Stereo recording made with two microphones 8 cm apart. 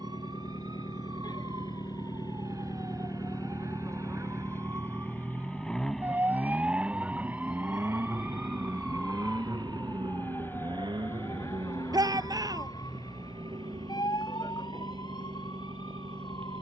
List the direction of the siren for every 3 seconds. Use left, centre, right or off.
right, right, centre, left, left, left.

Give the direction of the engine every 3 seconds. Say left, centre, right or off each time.
left, left, right, right, right, right.